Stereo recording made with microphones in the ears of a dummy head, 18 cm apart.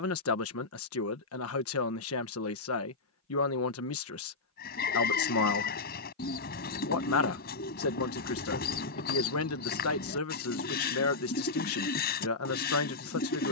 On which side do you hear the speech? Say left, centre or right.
left.